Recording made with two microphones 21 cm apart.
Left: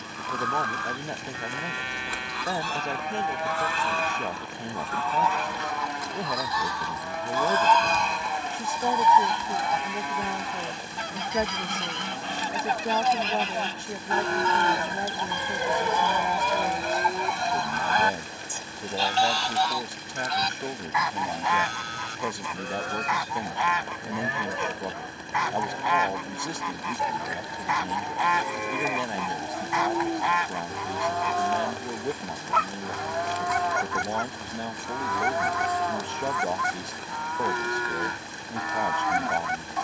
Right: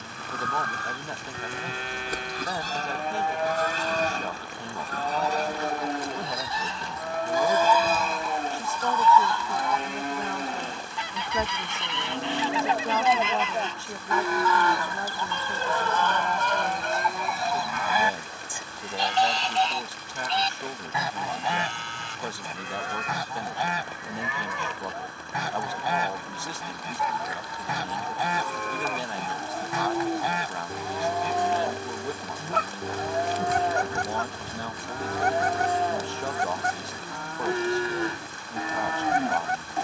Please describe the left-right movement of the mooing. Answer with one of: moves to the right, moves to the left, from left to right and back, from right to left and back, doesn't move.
from right to left and back.